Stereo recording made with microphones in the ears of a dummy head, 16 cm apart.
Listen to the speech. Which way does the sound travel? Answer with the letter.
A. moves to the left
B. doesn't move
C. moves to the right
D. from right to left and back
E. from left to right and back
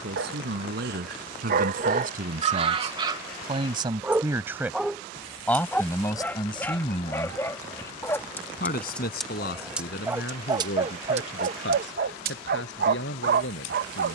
A.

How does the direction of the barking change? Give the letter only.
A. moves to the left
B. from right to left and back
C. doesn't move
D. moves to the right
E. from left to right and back
B.